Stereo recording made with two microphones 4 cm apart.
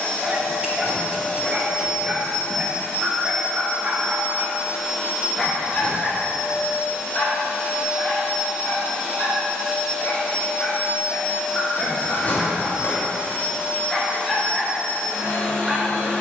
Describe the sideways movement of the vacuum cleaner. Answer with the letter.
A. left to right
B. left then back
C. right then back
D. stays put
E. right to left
C.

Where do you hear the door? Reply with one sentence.
You can hear the door on the left.